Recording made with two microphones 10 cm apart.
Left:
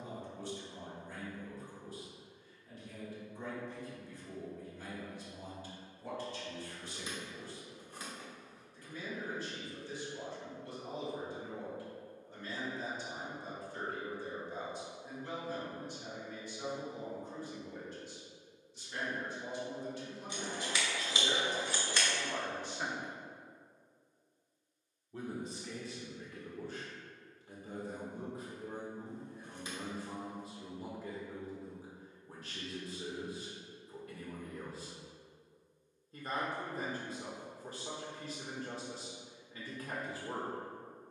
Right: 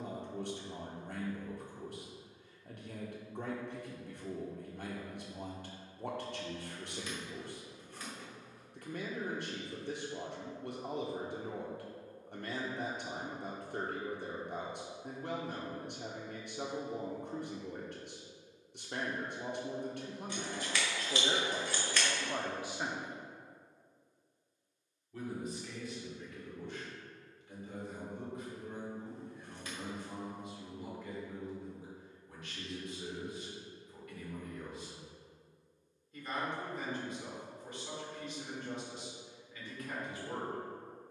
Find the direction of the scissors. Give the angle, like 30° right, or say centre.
20° left.